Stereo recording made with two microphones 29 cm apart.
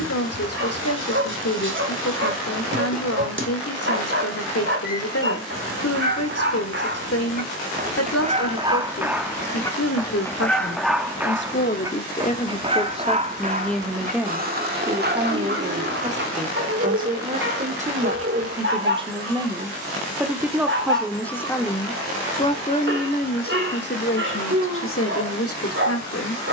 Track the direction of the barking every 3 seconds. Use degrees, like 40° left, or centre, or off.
50° right, 50° right, 30° right, centre, 30° right, 40° right, 40° right, 40° right, 40° right.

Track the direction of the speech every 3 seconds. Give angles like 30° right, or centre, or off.
60° left, 60° left, 60° left, 50° left, 10° left, 20° right, 10° right, 20° left, 50° left.